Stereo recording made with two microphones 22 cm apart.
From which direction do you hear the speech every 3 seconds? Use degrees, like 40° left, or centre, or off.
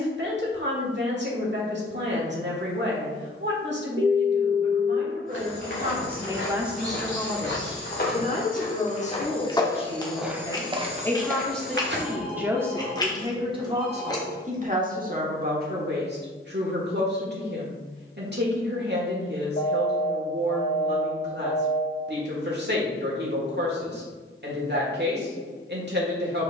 50° right, 50° right, 10° left, 20° left, 20° right, 50° right, 50° right, 50° right, 50° right.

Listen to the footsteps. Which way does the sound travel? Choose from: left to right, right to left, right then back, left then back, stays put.
left to right.